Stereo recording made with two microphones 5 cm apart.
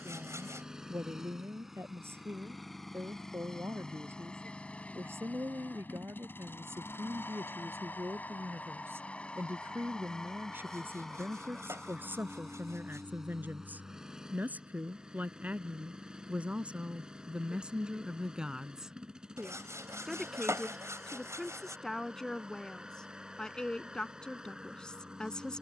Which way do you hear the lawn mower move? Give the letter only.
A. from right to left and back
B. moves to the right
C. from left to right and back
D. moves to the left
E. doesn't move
A.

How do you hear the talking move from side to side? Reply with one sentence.
You can hear the talking move from right to left.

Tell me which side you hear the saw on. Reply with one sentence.
You can hear the saw on the right.